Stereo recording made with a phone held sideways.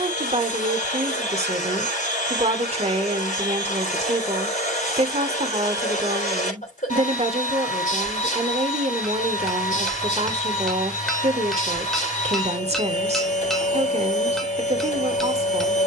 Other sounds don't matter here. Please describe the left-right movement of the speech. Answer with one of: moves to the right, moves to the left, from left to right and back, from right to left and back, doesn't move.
doesn't move.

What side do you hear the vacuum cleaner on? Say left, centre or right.
left.